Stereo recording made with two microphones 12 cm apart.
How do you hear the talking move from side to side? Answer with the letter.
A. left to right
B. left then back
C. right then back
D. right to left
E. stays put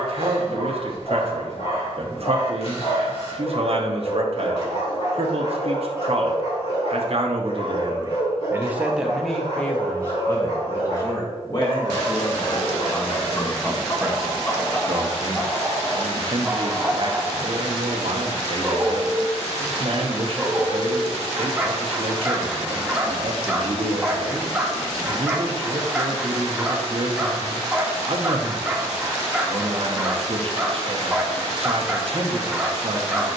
B.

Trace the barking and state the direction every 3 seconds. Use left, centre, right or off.
left, left, left, left, left, centre, centre, centre, centre, centre, centre.